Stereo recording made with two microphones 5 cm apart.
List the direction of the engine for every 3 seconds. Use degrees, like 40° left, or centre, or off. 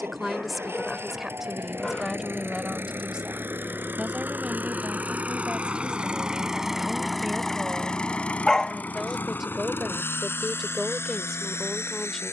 60° right, 40° right, 10° left, 60° left.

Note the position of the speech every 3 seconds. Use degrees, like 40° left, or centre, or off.
10° right, 20° right, 20° right, centre.